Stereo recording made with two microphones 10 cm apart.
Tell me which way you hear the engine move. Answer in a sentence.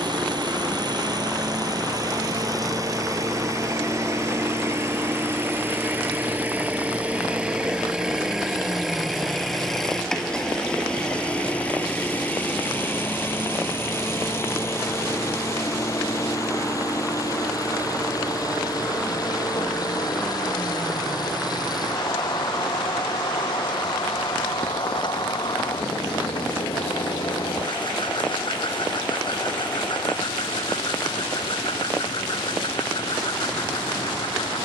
You can hear the engine move to the left.